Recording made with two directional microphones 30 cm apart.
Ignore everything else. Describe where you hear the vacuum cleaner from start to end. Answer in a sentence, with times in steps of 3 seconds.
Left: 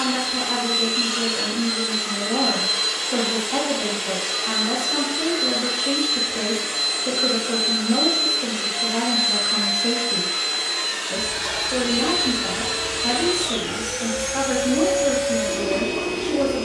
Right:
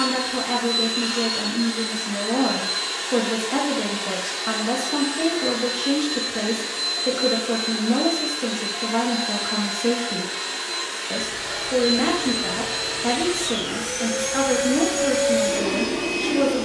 In this clip you hear the vacuum cleaner on the left from 0 s, in the centre from 12 s and on the right from 15 s.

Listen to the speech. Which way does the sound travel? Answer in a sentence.
In this clip you hear the speech stay put.